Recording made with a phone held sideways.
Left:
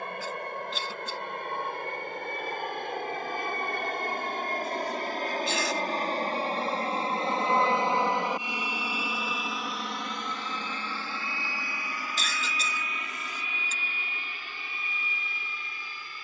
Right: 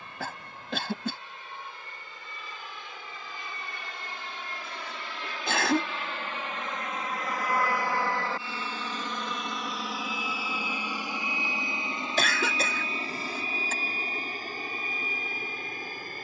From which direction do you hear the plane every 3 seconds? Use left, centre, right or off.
left, left, left, centre, right, right.